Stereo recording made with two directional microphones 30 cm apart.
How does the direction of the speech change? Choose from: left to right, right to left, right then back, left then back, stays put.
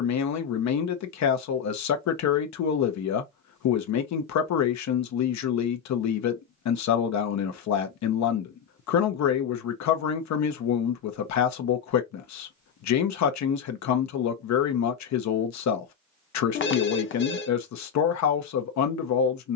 stays put.